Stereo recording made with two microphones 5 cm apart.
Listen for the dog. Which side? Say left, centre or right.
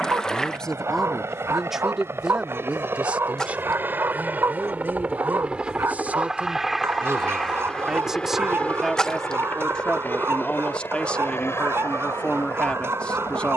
right.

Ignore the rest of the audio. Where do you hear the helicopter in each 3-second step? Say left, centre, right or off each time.
right, right, centre, left, left.